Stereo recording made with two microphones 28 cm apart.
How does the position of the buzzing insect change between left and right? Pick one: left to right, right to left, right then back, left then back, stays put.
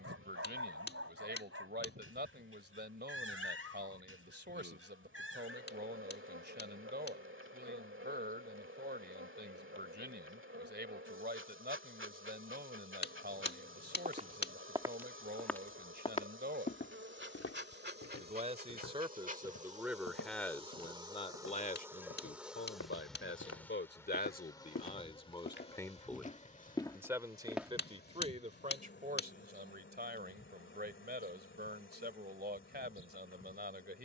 right to left.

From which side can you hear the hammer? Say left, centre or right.
left.